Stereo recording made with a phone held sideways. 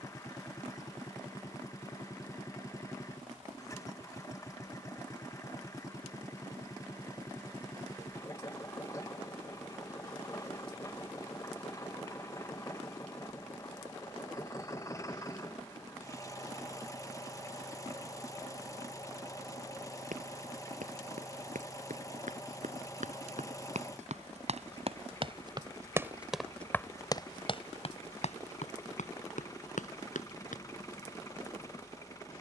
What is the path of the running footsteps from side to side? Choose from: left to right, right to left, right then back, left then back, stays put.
right to left.